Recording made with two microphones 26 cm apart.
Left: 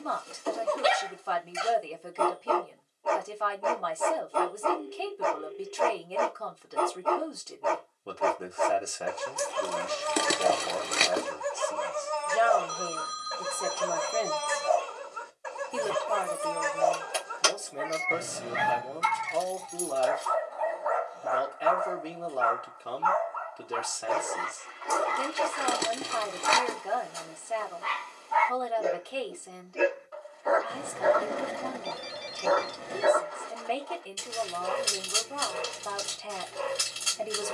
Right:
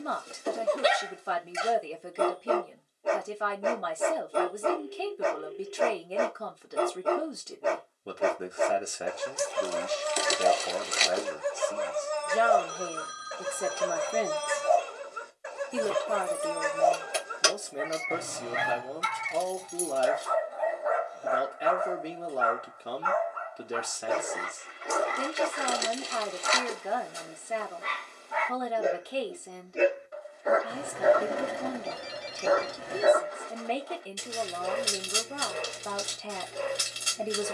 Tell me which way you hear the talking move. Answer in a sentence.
You can hear the talking stay put.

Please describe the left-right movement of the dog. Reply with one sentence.
You can hear the dog stay put.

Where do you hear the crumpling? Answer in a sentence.
You can hear the crumpling on the left.